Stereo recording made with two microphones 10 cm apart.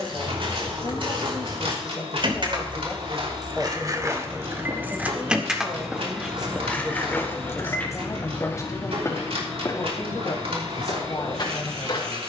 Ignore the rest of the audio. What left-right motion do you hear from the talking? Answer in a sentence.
In this clip you hear the talking go right and come back.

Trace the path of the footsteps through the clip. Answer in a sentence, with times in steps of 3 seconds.
In this clip you hear the footsteps on the right from 0 s, in the centre from 6 s and on the left from 9 s.